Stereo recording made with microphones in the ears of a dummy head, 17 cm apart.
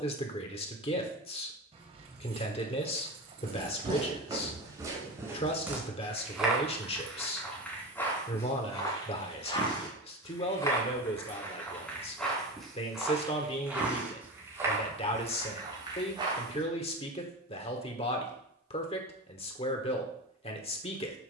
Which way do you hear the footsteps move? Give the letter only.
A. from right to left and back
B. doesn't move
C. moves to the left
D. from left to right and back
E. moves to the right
A.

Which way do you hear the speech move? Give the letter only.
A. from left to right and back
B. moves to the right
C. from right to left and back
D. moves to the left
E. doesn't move
E.